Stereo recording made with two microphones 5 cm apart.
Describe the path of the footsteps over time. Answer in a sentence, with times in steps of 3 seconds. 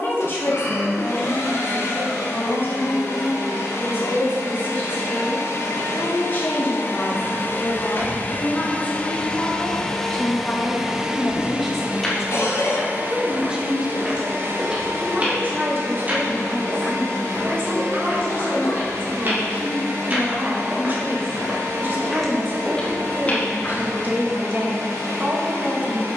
You can hear the footsteps not at all from 0 s, on the left from 6 s, in the centre from 12 s, on the right from 15 s, in the centre from 21 s and not at all from 24 s.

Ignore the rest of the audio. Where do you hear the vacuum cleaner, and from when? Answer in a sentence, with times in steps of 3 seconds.
You can hear the vacuum cleaner on the left from 0 s, in the centre from 9 s and on the right from 12 s.